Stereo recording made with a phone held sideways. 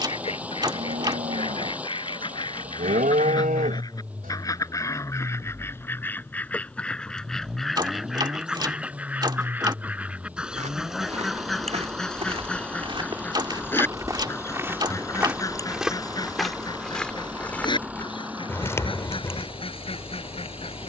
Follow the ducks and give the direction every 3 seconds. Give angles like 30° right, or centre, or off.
40° left, 20° left, centre, 10° right, 10° left, 30° left, 40° left.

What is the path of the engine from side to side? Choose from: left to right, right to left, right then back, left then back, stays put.
stays put.